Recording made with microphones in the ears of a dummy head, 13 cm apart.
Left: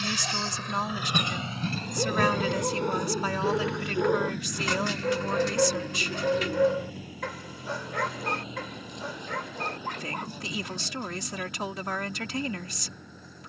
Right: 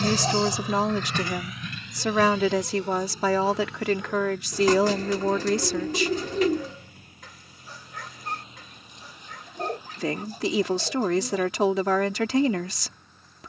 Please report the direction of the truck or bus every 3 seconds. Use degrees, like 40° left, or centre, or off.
20° left, 60° left, 60° left, 70° left, 70° left.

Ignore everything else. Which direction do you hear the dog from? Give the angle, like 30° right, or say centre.
50° left.